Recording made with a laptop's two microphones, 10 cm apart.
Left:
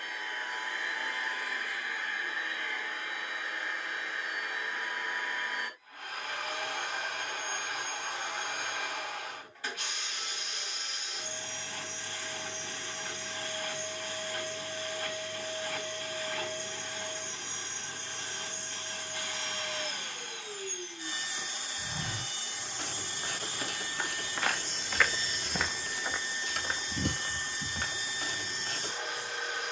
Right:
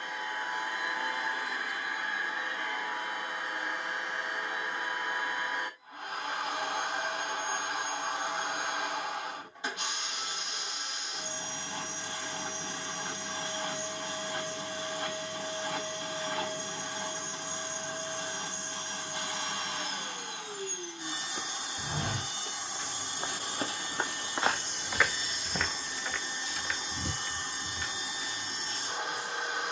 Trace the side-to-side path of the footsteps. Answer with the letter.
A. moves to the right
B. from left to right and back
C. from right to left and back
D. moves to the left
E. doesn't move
D.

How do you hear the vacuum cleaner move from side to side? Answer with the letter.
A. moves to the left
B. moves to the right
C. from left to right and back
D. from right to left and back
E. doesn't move
E.